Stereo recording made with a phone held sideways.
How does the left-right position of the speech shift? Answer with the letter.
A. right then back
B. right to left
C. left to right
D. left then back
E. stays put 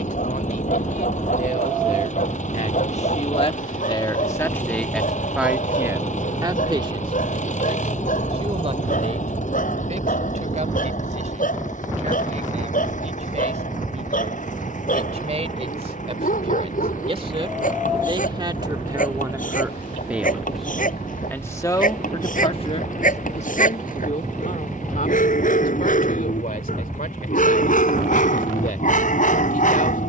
A.